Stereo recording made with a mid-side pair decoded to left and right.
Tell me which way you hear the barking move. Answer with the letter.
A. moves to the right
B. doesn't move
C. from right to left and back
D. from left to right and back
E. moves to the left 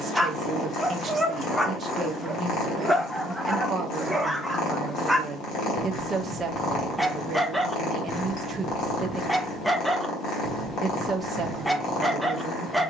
B.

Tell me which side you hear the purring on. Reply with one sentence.
In this clip you hear the purring on the left.